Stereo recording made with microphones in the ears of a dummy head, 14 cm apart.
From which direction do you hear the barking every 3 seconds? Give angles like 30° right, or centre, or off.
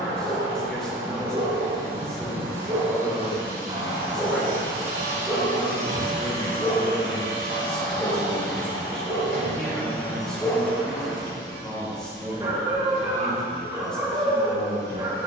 30° right, 10° right, 10° left, centre, 20° right.